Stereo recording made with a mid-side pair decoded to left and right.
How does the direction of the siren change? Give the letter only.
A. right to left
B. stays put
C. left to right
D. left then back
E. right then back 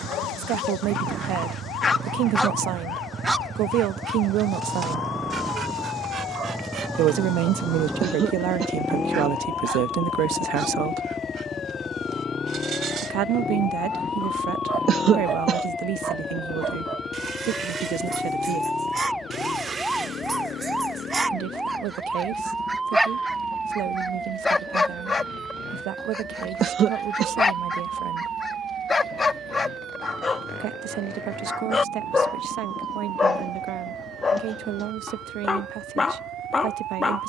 C.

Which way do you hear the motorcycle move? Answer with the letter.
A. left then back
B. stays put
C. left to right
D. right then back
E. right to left
E.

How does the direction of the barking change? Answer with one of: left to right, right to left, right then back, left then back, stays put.
right then back.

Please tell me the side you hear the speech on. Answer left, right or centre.
right.